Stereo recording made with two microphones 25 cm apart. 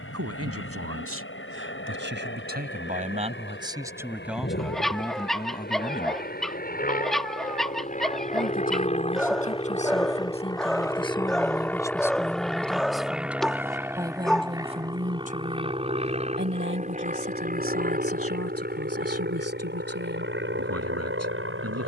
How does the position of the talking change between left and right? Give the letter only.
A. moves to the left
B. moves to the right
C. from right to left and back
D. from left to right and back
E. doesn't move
C.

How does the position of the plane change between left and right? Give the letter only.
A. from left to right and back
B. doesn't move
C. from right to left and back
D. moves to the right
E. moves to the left
D.